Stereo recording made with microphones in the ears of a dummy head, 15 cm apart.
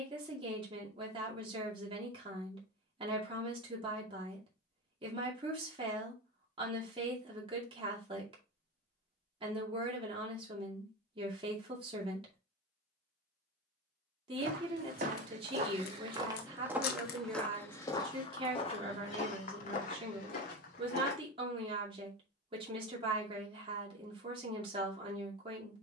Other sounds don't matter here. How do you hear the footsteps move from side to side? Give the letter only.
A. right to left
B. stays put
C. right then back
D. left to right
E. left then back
A.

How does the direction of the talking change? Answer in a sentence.
In this clip you hear the talking stay in one place.